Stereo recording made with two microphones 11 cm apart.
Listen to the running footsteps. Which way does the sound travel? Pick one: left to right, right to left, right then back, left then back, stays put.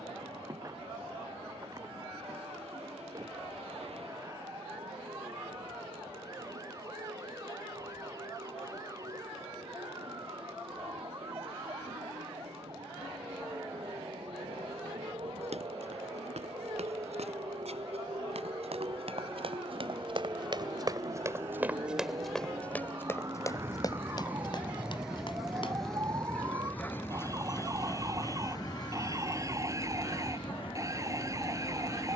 right to left.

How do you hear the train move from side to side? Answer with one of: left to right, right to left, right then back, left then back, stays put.
right to left.